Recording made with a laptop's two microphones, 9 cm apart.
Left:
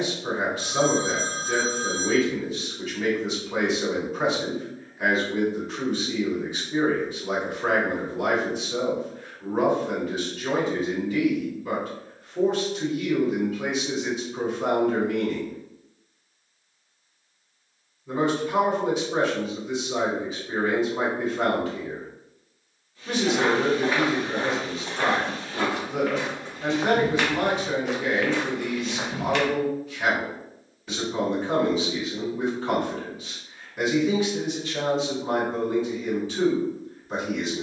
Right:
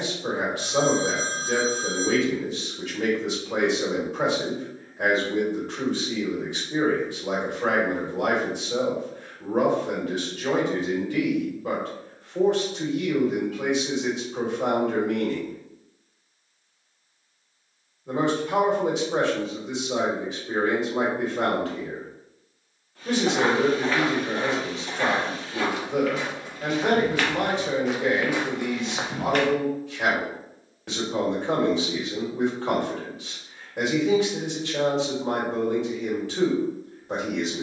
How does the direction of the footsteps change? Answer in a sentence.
In this clip you hear the footsteps move from right to left and back again.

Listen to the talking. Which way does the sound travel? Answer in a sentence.
In this clip you hear the talking stay in one place.